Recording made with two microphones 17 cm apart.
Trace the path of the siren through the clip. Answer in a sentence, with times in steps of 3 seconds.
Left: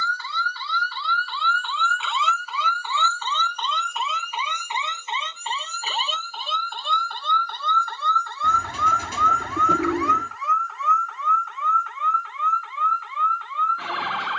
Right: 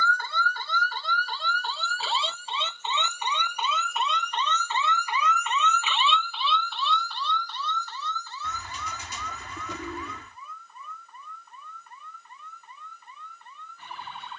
In this clip you hear the siren on the right from 0 s, in the centre from 3 s and on the left from 6 s.